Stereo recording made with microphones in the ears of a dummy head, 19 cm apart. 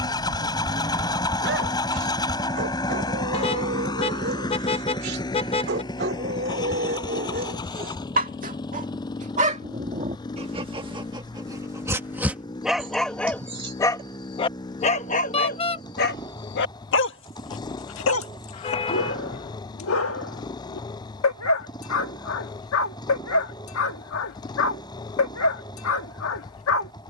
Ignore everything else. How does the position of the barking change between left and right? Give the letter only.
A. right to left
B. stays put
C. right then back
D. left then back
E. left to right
A.